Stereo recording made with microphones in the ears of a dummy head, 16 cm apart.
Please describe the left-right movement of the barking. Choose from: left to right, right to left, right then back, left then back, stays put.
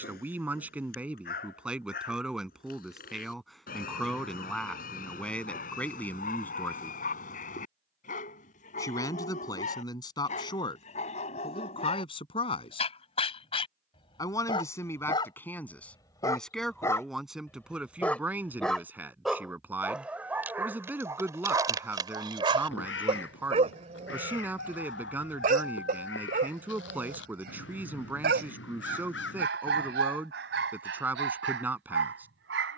left to right.